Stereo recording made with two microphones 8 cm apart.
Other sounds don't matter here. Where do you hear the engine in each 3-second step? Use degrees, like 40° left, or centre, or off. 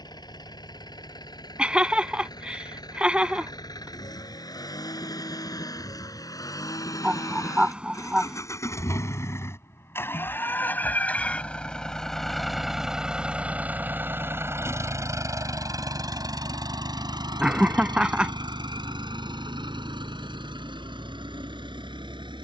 60° left, 50° left, 40° left, 20° left, 20° right, 50° right, 70° right, 80° right.